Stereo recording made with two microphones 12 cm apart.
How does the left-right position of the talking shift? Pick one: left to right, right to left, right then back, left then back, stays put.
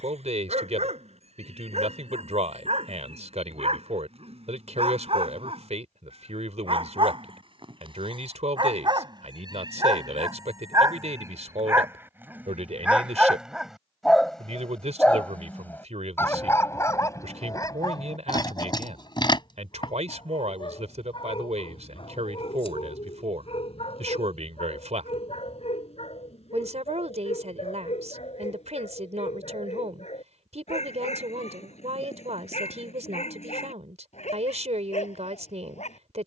stays put.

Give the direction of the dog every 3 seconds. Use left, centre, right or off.
right, right, right, right, centre, left, left, left, left, left, left, left.